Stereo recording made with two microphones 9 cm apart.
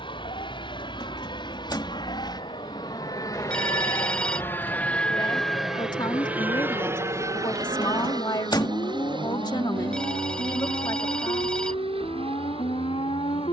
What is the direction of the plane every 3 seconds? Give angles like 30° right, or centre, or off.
60° left, 20° left, 30° right, 60° right, 70° right.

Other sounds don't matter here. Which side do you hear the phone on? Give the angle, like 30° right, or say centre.
10° left.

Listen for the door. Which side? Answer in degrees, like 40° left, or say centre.
50° left.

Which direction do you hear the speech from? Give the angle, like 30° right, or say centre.
50° left.